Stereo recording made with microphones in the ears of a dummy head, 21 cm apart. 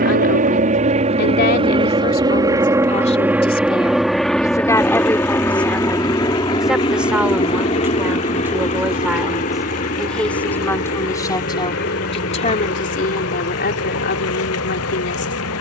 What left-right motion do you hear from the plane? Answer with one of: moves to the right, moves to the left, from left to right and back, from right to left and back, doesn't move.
moves to the left.